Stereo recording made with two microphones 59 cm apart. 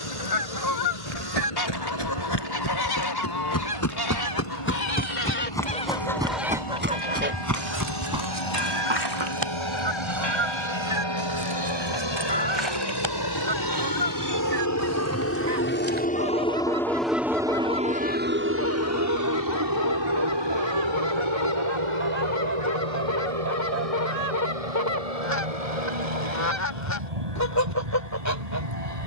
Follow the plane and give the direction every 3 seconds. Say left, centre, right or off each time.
left, left, left, left, left, centre, right, right, right, right.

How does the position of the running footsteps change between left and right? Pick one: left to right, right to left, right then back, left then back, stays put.
left to right.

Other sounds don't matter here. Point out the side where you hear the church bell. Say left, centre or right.
right.